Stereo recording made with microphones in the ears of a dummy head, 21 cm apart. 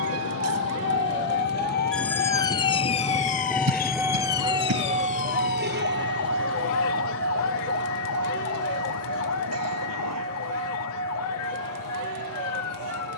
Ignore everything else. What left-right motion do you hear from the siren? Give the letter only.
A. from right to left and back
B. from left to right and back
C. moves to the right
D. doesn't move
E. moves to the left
E.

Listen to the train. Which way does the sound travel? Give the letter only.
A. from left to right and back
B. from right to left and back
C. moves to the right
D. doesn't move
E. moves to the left
C.